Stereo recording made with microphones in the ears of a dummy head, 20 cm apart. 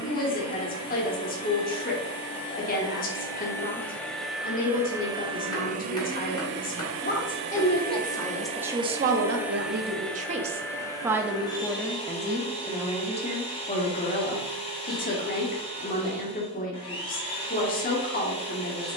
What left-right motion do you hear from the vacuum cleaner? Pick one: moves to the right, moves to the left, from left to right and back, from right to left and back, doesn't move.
from left to right and back.